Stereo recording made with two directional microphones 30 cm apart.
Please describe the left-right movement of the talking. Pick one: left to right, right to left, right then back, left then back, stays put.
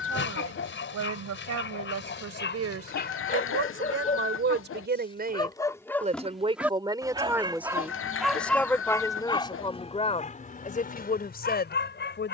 right to left.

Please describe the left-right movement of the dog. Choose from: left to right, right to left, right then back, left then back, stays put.
right then back.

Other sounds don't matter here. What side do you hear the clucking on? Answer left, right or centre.
left.